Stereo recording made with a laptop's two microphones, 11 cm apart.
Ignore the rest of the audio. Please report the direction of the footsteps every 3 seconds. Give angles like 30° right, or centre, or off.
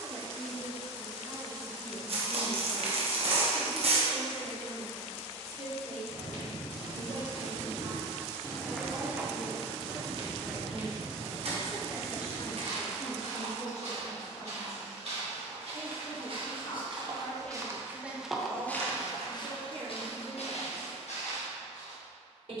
off, off, 50° left, 50° right, 60° right, 40° right, 40° left, 70° left.